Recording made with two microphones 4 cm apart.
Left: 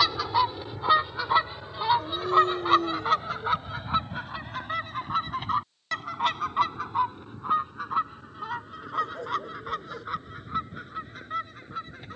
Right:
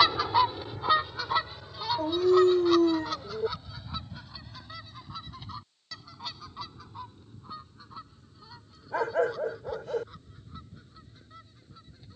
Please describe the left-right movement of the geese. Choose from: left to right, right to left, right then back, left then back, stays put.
right to left.